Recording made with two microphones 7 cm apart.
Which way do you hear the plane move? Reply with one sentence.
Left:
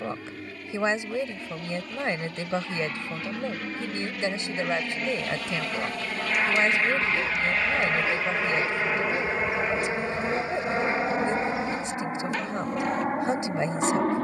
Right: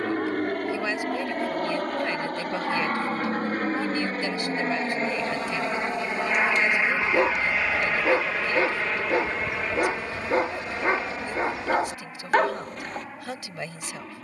You can hear the plane travel towards the left.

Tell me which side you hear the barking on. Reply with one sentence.
You can hear the barking on the right.